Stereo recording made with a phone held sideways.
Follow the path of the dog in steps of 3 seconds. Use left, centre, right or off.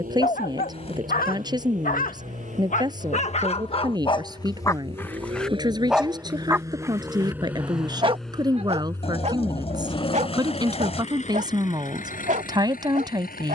left, left, right, right, right.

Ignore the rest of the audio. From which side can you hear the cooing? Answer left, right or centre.
left.